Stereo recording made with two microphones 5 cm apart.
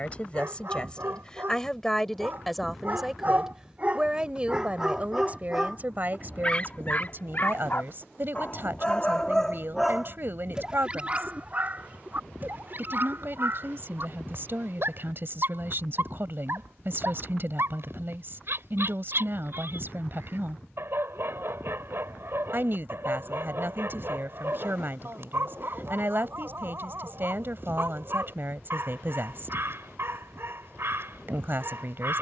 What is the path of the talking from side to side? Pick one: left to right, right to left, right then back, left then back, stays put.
left to right.